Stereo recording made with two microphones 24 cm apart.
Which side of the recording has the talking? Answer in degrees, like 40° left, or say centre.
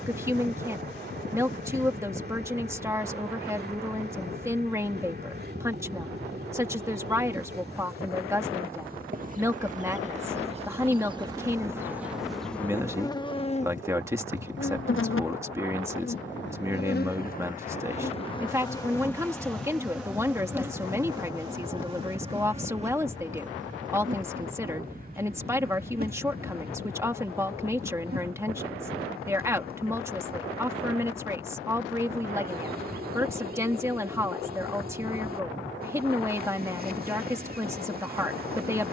10° right.